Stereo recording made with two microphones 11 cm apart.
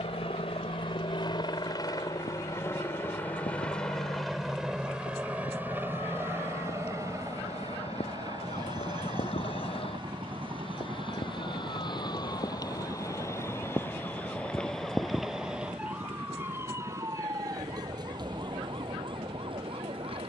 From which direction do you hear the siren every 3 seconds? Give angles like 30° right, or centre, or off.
80° left, 70° left, 60° left, 50° left, 20° left, 20° right, 40° right.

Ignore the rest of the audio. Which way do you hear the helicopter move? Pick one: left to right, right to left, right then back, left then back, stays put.
left to right.